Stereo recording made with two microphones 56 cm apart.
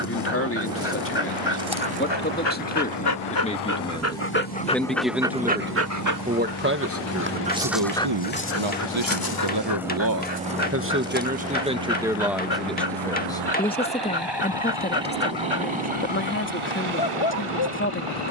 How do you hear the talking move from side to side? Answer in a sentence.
You can hear the talking move from left to right and back again.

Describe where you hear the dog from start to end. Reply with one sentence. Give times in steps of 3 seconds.
You can hear the dog on the left from 0 s, in the centre from 3 s and on the left from 9 s.